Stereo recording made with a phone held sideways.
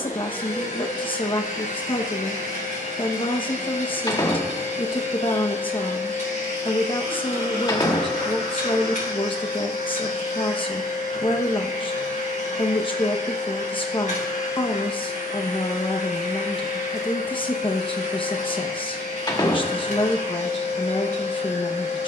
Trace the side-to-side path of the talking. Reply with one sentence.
In this clip you hear the talking stay put.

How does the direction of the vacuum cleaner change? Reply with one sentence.
In this clip you hear the vacuum cleaner stay put.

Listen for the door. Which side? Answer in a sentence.
You can hear the door on the left.